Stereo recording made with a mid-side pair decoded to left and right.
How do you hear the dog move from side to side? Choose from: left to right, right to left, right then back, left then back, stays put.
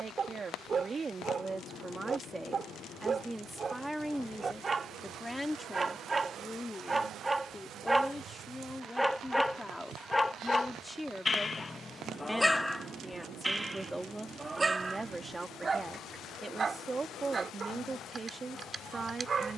left then back.